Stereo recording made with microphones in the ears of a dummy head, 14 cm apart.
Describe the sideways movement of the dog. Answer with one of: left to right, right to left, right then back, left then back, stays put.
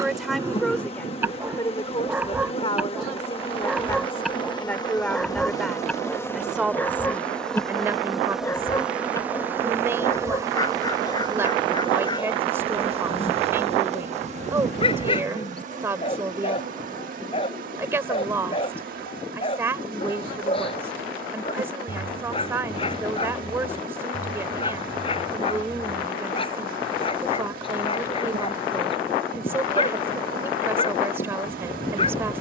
right to left.